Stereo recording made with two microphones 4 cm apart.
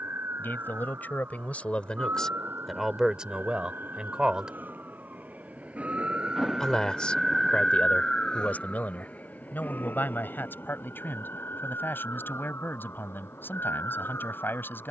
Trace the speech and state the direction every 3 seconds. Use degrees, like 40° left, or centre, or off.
30° left, 20° right, 30° left, 60° left, 60° left.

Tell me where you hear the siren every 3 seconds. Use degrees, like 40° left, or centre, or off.
70° right, 50° right, centre, 50° left, 70° left.